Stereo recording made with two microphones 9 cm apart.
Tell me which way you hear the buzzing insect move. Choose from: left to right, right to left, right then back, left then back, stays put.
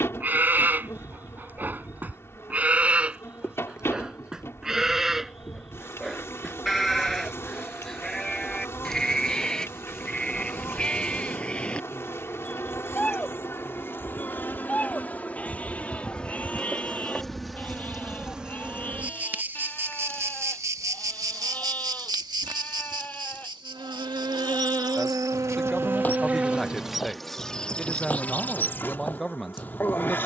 right then back.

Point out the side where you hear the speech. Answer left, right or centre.
centre.